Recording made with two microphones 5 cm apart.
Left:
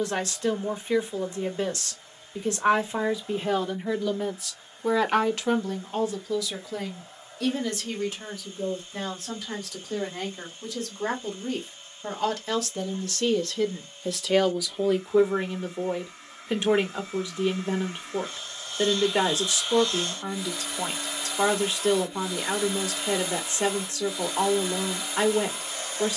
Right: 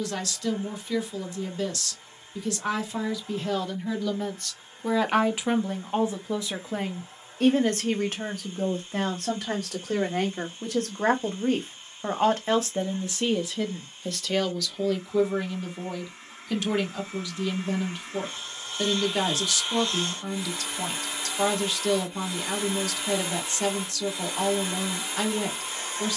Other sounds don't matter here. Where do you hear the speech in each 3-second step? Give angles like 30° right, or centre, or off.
30° left, centre, 40° right, 60° right, 10° right, 20° left, 20° left, 20° left, 20° left.